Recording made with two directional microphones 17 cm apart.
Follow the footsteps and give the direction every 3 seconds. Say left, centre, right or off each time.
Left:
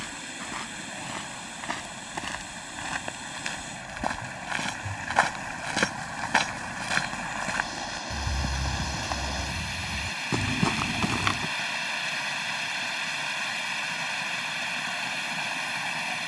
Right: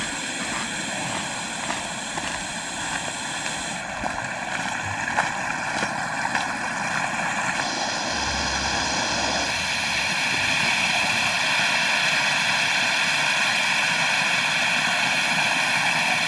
right, centre, left, left, off, off.